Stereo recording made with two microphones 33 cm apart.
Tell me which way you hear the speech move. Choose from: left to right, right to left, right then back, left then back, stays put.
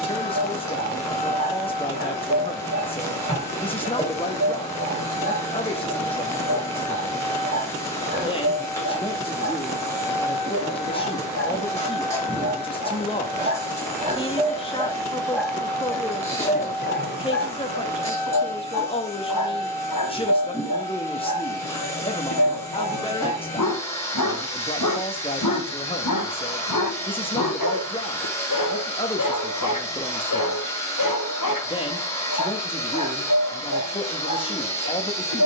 stays put.